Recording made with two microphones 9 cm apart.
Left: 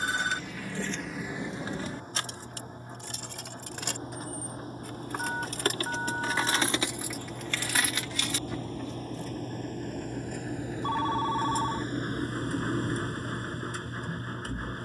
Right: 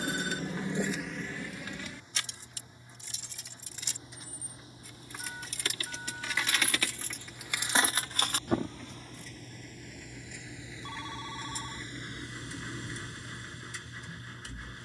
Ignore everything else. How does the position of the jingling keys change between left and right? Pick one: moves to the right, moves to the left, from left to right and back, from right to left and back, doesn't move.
from right to left and back.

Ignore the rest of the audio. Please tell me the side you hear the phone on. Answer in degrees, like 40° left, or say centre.
60° left.